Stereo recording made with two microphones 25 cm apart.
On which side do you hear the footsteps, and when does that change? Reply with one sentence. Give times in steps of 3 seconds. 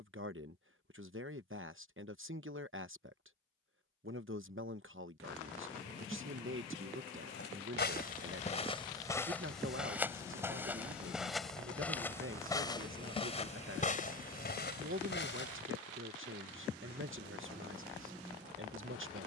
You can hear the footsteps not at all from 0 s, on the left from 6 s, in the centre from 9 s, on the left from 12 s and not at all from 18 s.